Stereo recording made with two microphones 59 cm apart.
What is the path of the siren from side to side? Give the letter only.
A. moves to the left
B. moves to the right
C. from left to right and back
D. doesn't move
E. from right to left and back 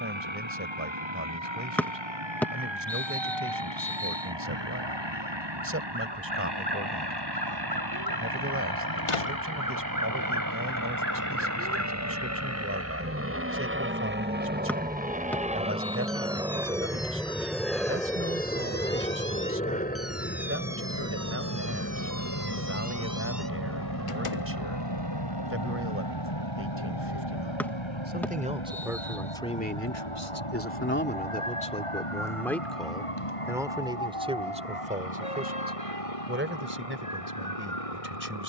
A.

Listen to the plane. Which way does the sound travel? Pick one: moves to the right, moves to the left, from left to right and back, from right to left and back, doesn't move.
moves to the left.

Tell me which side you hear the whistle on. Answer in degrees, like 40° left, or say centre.
centre.